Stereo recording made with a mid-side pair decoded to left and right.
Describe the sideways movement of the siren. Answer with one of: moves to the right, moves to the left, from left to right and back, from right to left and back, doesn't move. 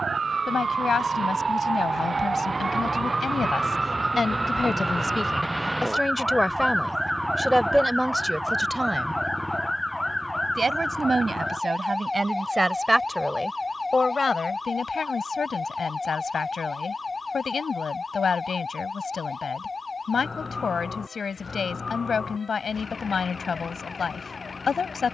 moves to the left.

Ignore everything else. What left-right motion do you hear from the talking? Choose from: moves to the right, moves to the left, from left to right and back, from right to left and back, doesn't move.
from left to right and back.